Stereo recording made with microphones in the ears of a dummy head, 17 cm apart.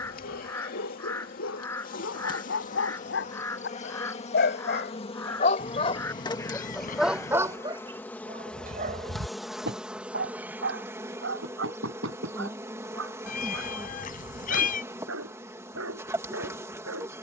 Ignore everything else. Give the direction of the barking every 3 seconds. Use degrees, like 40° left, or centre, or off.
70° left, 50° left, 20° right, 60° right, 70° right, 80° right.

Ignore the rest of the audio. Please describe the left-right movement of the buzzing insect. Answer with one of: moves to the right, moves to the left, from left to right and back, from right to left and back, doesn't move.
moves to the right.